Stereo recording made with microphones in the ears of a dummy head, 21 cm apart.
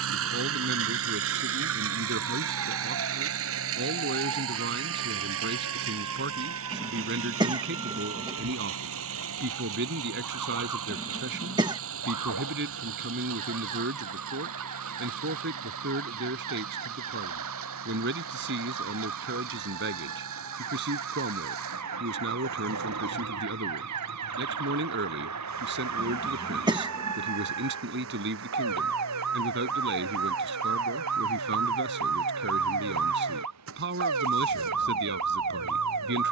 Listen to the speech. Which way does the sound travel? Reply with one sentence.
You can hear the speech stay put.